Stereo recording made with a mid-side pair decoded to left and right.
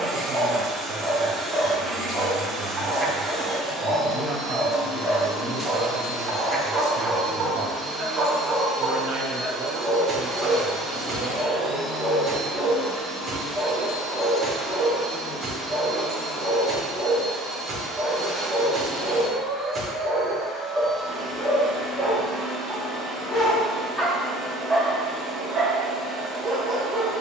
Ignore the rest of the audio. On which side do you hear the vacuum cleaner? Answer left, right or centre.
centre.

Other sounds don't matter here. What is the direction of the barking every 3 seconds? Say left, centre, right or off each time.
right, right, right, right, right, right, right, centre, centre.